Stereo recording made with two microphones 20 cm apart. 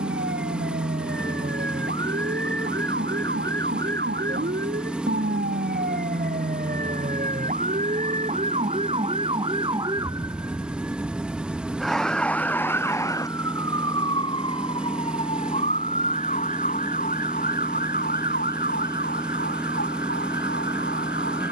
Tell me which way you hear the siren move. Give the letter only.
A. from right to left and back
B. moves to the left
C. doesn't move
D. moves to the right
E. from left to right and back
B.